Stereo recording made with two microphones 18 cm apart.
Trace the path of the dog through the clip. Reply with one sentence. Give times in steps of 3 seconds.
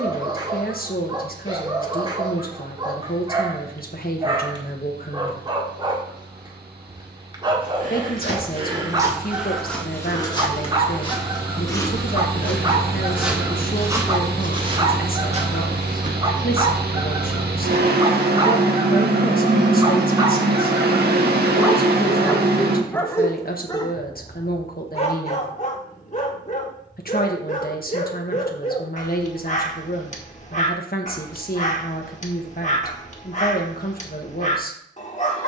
In this clip you hear the dog on the right from 0 s, in the centre from 21 s and on the left from 24 s.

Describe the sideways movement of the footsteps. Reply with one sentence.
In this clip you hear the footsteps go left and come back.